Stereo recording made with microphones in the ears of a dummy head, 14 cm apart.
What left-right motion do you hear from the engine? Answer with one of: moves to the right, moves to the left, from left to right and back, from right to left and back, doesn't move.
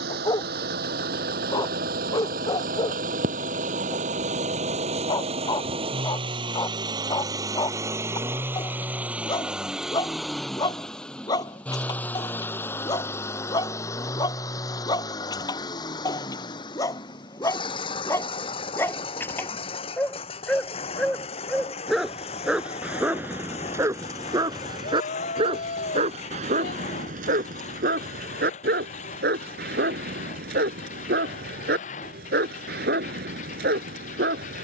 moves to the left.